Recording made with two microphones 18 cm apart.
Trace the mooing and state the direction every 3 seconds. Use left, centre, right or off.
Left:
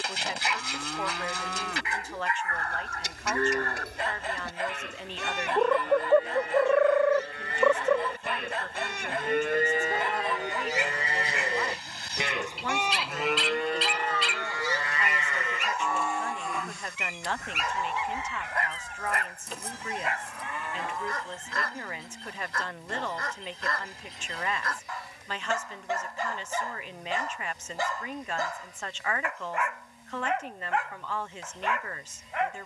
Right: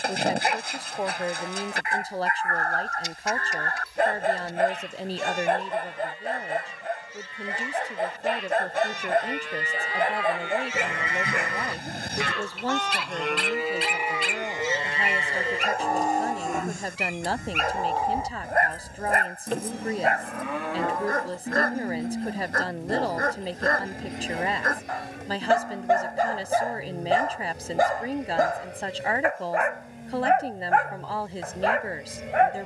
left, left, left, left, centre, right, right, right, right, right, right.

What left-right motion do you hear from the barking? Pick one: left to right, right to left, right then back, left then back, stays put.
stays put.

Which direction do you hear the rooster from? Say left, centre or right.
left.